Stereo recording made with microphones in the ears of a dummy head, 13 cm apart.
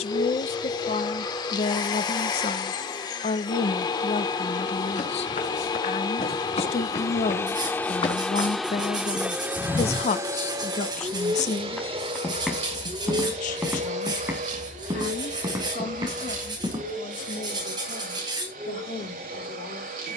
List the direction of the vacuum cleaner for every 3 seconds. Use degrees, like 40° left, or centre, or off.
30° left, 30° left, 20° left, 20° right, 50° right, 60° right, 70° right.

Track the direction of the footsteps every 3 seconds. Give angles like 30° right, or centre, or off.
off, 60° left, 40° left, 20° left, 10° right, 30° right, off.